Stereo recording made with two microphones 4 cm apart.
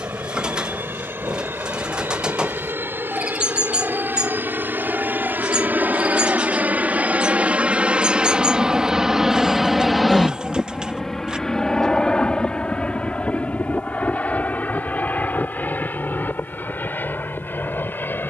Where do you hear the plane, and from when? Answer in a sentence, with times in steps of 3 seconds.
In this clip you hear the plane on the right from 0 s, in the centre from 9 s and on the left from 12 s.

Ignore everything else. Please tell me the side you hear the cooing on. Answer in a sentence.
You can hear the cooing on the right.